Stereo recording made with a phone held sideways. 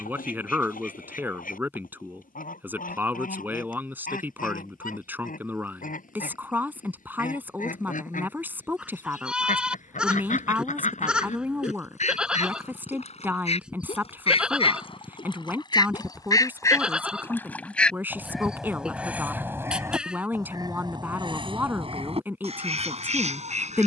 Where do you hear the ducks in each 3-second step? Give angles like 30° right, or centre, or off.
70° left, 70° left, 70° left, 60° left, 50° left, 20° left, 10° right, 40° right.